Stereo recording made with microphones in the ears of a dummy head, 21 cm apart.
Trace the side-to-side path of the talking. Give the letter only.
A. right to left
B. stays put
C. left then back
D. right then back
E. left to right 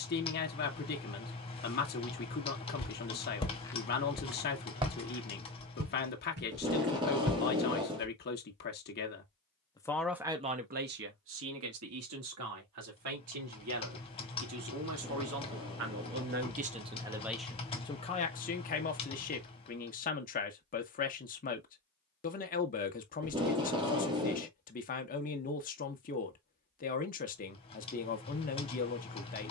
D.